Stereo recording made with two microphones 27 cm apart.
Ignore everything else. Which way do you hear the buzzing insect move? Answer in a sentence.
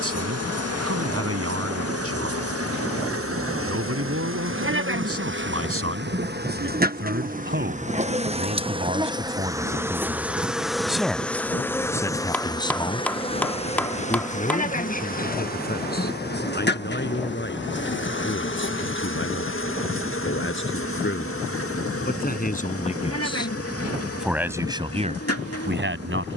You can hear the buzzing insect travel towards the left.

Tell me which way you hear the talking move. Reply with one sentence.
You can hear the talking go left and come back.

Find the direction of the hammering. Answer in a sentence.
In this clip you hear the hammering in the centre.